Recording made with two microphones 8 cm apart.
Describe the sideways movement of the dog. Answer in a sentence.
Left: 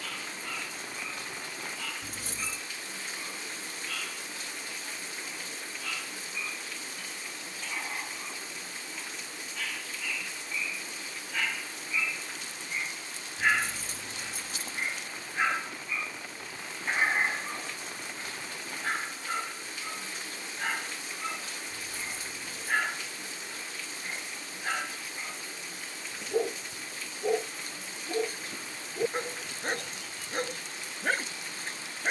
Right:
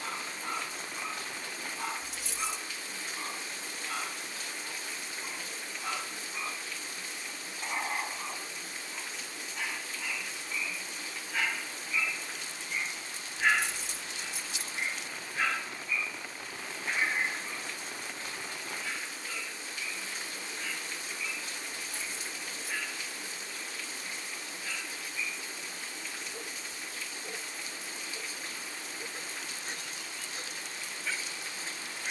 You can hear the dog move from right to left.